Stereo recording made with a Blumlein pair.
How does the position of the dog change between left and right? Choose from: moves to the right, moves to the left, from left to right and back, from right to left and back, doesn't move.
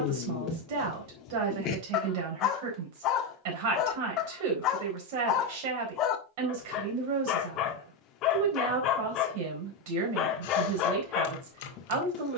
doesn't move.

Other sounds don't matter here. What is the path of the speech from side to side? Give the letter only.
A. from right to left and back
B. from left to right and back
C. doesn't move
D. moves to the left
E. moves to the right
C.